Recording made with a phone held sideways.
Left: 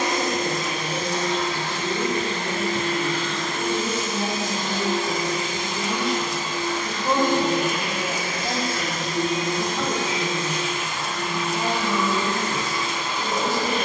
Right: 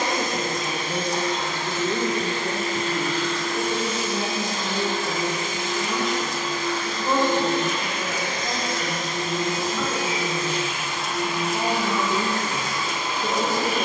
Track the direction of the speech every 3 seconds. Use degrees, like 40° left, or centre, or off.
50° right, 20° right, 20° left, 10° left, 40° right.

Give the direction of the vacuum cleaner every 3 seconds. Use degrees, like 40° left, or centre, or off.
70° left, 50° left, 10° left, 10° right, 10° right.